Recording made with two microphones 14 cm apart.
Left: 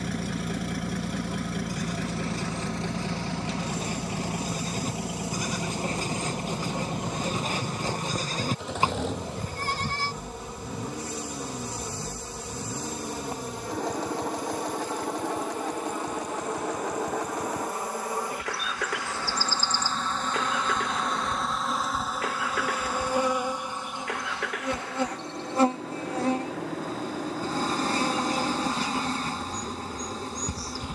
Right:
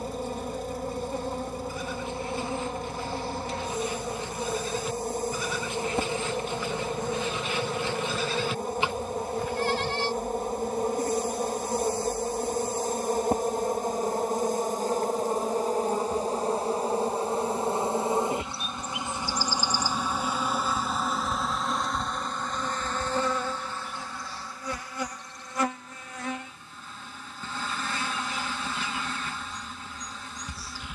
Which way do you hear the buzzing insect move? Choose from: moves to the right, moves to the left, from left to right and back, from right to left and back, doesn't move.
moves to the left.